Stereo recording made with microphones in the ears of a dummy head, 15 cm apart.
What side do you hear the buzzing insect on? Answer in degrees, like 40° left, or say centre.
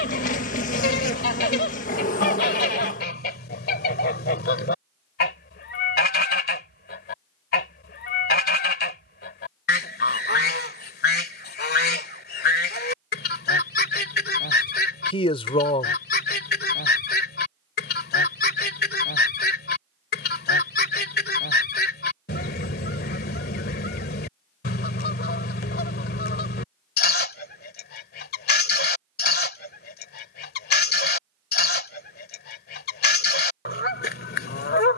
50° left.